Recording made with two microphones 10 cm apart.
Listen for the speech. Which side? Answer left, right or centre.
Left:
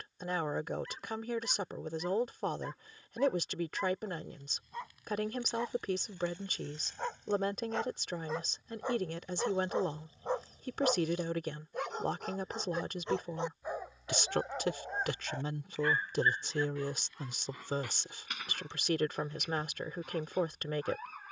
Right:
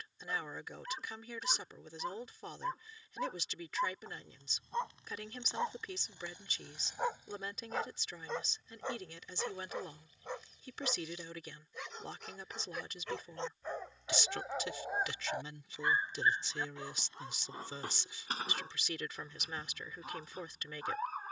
left.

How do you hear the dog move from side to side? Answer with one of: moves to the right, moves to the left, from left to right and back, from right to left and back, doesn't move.
from right to left and back.